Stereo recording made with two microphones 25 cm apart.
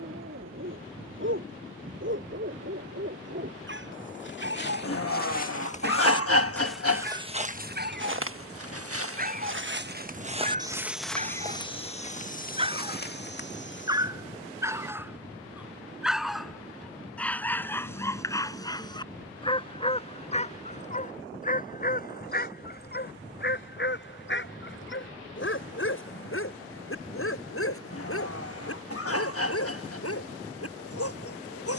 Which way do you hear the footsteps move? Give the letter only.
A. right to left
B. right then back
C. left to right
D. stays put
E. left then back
B.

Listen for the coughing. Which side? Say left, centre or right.
left.